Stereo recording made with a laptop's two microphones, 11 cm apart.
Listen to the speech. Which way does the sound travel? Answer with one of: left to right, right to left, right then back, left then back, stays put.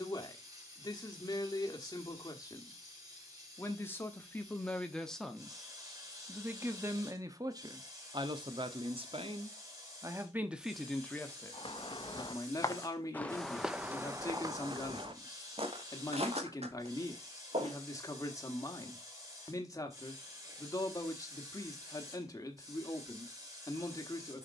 right then back.